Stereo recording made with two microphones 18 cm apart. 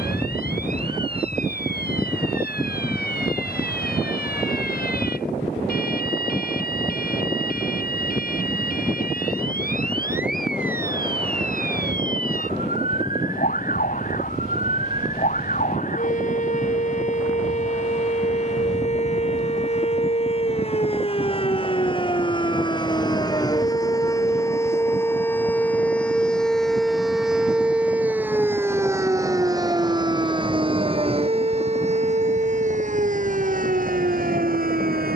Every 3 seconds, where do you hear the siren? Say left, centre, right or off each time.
left, left, left, left, left, left, left, left, centre, centre, right, right.